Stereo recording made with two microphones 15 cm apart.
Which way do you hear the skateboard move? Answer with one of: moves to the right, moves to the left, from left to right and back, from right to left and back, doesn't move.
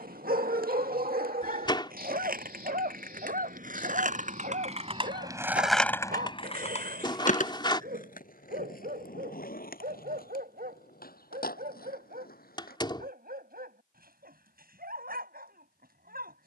moves to the left.